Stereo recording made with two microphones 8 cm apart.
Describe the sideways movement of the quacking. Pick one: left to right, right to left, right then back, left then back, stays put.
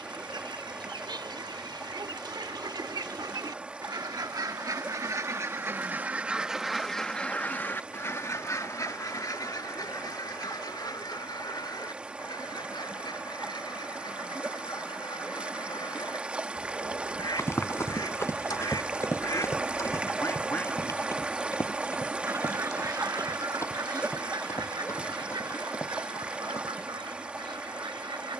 left then back.